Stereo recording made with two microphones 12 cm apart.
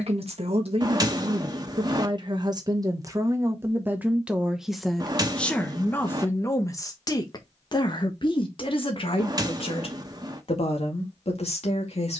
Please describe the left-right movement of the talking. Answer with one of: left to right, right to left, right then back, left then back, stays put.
right to left.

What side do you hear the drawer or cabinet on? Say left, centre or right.
right.